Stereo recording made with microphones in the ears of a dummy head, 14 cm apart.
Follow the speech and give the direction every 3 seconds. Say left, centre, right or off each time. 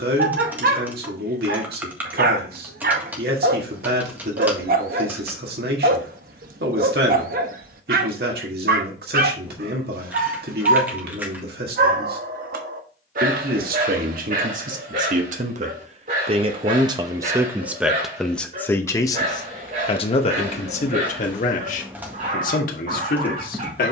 right, right, right, right, right, right, left, left.